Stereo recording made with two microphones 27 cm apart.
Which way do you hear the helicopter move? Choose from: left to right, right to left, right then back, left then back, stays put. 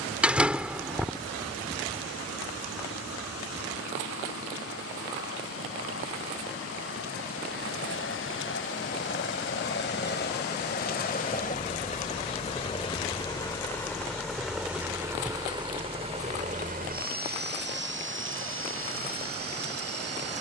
left to right.